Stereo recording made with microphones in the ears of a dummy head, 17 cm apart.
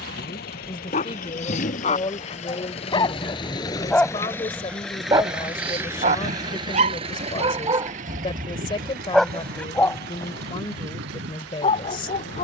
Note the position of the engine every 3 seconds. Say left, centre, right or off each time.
left, centre, right, right.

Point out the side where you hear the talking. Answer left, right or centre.
left.